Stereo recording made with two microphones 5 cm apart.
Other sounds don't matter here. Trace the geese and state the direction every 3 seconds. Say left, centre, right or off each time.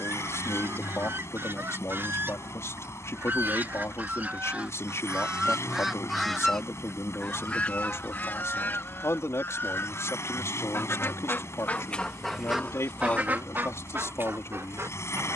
right, right, left, left, right.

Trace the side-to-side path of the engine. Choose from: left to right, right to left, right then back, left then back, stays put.
stays put.